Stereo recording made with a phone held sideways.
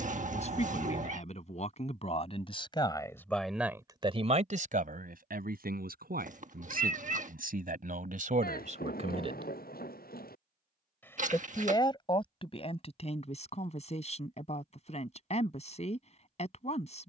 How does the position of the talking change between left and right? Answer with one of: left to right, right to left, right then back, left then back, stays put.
right then back.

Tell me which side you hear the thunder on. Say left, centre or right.
left.